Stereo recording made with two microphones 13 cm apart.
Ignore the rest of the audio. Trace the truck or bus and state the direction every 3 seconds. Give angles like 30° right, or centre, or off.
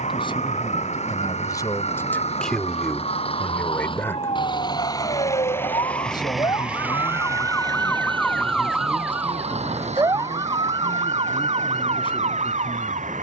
60° left, 30° left, 20° right, 60° right, 70° right.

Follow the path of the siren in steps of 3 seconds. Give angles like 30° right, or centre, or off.
60° left, 50° left, 20° left, 30° right, 60° right.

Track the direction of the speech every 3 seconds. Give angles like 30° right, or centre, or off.
20° left, 10° left, 40° left, 40° left, 40° left.